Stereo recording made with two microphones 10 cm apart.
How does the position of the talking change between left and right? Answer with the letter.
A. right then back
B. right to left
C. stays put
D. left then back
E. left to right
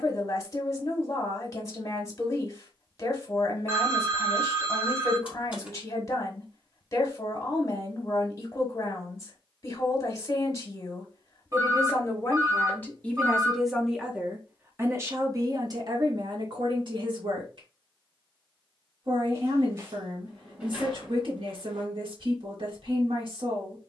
E.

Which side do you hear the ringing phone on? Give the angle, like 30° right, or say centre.
30° right.